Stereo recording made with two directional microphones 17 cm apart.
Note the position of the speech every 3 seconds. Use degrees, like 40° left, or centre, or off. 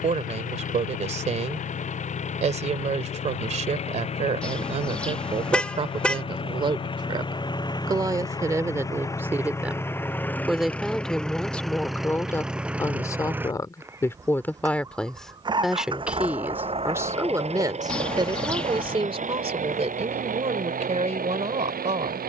40° right, 40° right, 20° right, centre, 10° left, 10° right, 40° right, 40° right.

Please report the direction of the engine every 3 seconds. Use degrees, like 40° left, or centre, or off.
50° left, 40° left, 30° left, 10° left, 10° right, 30° right, 50° right, 60° right.